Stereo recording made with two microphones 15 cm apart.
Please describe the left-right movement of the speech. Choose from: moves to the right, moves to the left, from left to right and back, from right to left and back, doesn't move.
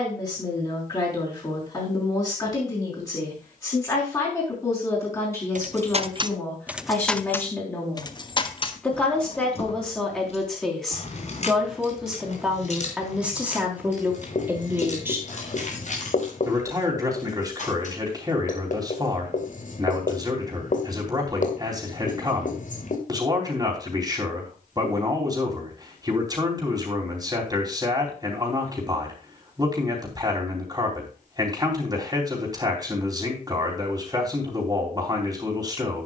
moves to the right.